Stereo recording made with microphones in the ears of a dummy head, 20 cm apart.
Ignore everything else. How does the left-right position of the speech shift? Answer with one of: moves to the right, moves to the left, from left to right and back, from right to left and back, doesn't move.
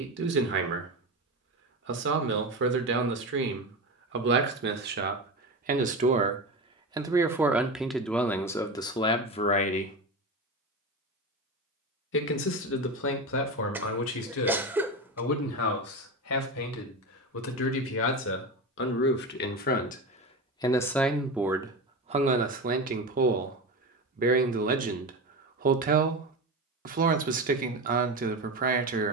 from right to left and back.